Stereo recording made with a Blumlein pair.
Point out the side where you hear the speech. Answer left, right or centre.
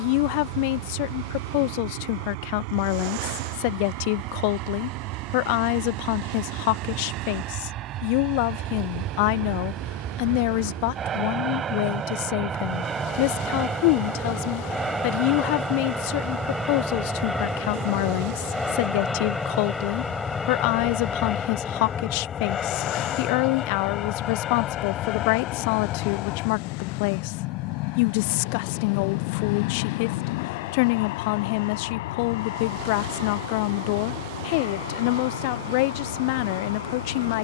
left.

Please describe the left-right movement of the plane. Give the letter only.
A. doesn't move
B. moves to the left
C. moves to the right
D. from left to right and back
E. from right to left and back
B.